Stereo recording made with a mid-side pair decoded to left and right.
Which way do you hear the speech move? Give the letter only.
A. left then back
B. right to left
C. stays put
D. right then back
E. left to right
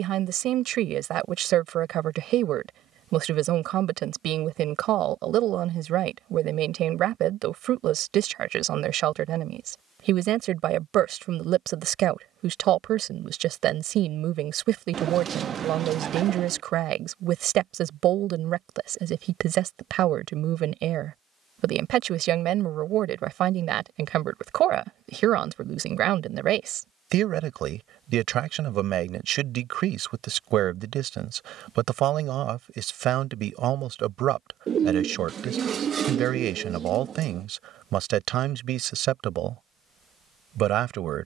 C.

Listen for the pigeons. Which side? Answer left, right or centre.
right.